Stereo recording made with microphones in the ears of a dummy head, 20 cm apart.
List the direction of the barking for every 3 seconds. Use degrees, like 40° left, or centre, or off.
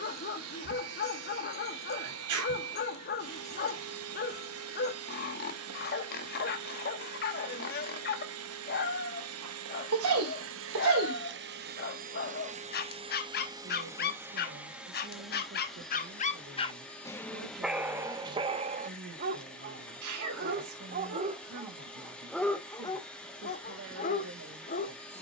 40° left, 40° left, 40° left, 40° left, 40° left, 20° left, 30° right, centre, 40° left.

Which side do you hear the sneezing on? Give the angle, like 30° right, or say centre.
70° right.